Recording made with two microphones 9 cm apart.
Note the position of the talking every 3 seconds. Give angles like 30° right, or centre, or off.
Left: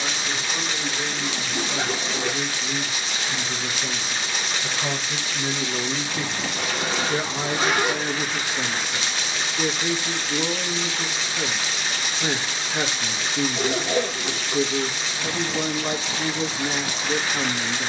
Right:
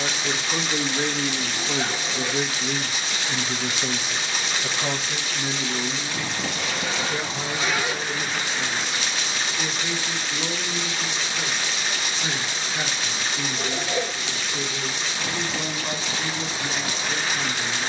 50° right, 10° right, 40° left, 50° left, 50° left, 50° left.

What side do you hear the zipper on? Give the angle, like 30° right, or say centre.
50° left.